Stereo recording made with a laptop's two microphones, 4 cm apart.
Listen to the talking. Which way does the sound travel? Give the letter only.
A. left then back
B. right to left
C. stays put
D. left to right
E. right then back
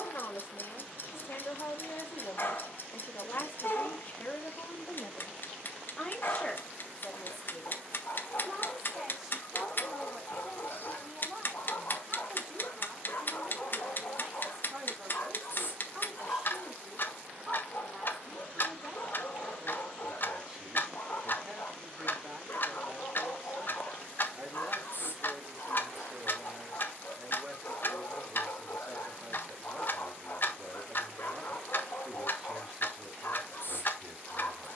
D.